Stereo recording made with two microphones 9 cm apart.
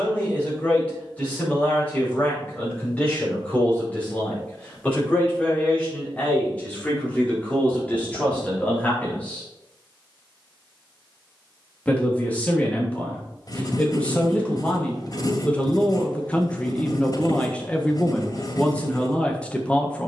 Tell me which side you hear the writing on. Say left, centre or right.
left.